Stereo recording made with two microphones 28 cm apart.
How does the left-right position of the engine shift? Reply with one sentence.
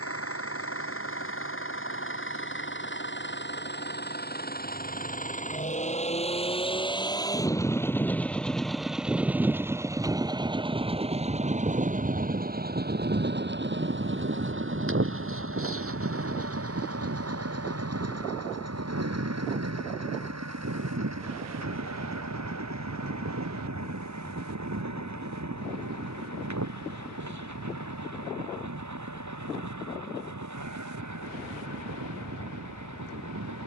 In this clip you hear the engine move from left to right.